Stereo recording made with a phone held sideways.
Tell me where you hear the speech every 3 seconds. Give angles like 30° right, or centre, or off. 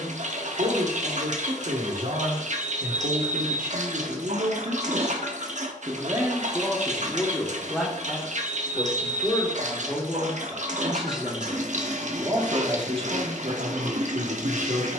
70° right, 60° right, centre, 10° left, 50° right.